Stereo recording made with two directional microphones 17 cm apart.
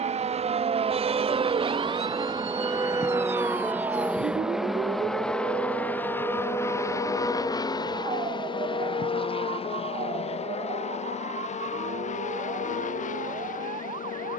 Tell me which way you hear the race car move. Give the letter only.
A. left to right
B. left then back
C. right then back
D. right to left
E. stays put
D.